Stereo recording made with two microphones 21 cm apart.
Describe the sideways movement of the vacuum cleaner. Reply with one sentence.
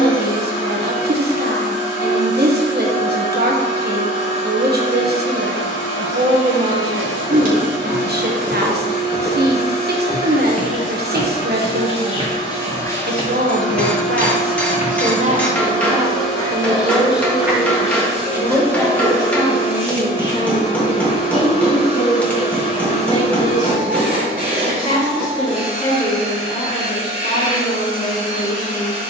You can hear the vacuum cleaner move to the right.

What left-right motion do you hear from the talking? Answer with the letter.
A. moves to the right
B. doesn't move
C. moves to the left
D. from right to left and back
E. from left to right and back
C.